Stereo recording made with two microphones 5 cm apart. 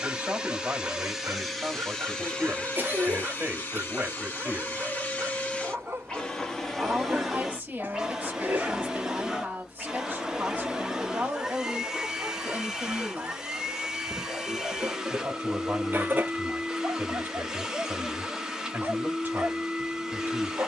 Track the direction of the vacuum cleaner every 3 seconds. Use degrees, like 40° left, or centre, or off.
centre, 30° left, centre, 10° right, 10° right, 10° right, 10° right.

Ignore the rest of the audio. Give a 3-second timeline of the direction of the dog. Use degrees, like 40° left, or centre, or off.
50° right, 50° right, 30° right, 10° right, 30° right, 40° right, 40° right.